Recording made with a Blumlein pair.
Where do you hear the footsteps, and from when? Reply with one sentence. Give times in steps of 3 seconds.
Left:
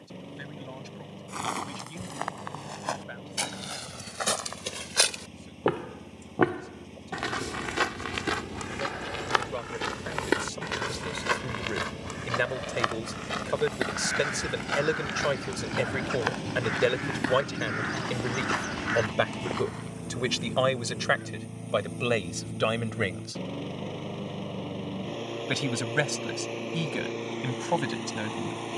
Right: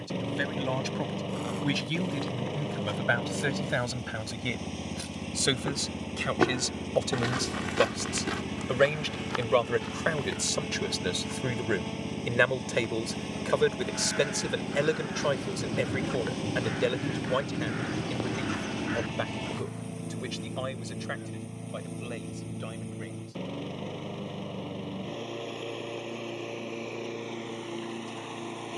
In this clip you hear the footsteps on the left from 0 s, in the centre from 6 s, on the left from 9 s and not at all from 21 s.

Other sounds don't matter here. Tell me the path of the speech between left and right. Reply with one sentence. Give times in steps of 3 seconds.
In this clip you hear the speech on the right from 0 s, in the centre from 12 s and on the left from 18 s.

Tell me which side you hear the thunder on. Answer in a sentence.
You can hear the thunder in the centre.